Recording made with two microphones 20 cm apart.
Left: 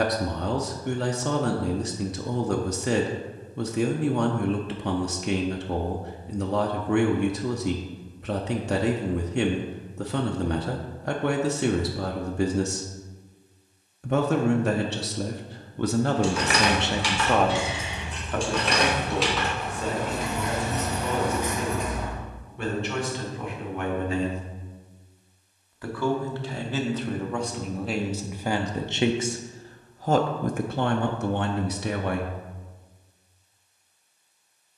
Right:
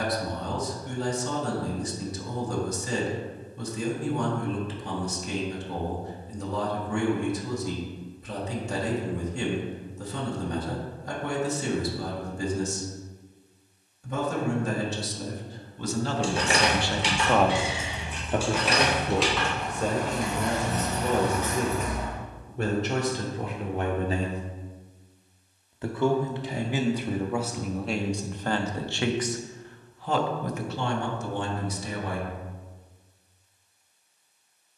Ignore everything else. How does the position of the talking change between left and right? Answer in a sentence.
You can hear the talking move from left to right and back again.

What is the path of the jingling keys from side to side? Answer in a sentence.
You can hear the jingling keys move from right to left.